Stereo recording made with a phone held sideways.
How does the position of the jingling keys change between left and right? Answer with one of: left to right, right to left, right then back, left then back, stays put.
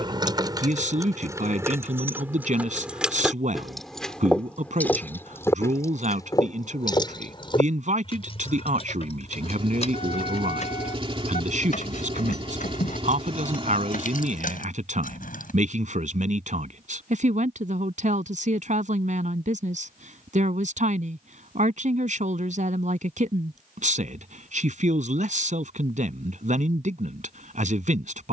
right to left.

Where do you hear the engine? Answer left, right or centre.
right.